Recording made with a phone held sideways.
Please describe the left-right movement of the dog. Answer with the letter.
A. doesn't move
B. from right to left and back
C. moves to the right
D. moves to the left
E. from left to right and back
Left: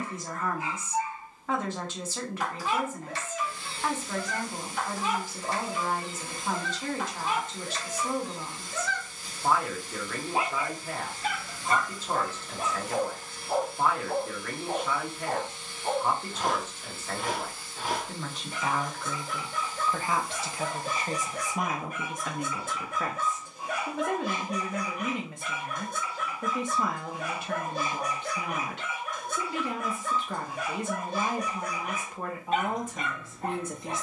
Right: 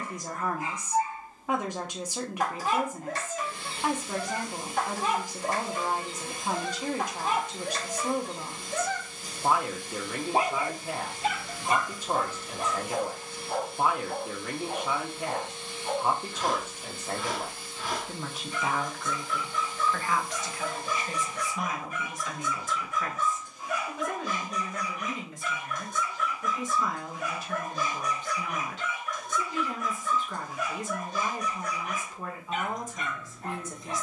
D.